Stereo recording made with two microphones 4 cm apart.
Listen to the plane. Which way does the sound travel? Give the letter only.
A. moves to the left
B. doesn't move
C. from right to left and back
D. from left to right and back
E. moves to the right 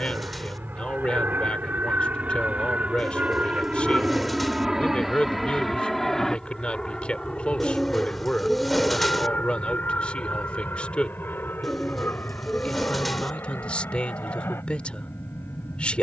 A.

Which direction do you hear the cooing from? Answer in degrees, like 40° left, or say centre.
centre.